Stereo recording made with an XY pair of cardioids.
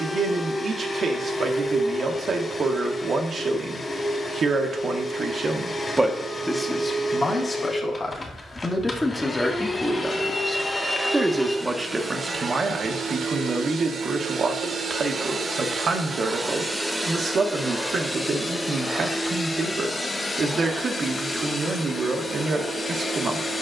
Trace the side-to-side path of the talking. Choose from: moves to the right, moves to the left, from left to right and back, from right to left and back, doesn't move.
from right to left and back.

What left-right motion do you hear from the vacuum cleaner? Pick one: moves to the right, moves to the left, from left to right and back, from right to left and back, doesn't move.
from left to right and back.